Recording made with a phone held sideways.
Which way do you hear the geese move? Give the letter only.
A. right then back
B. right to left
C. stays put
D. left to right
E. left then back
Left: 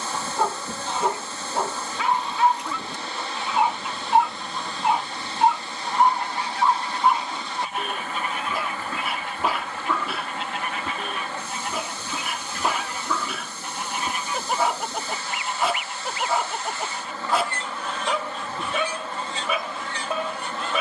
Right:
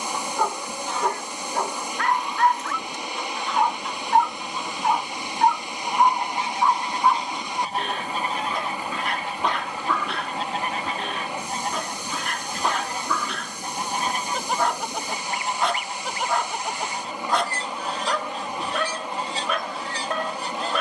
D.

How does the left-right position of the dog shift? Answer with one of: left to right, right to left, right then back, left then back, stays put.
stays put.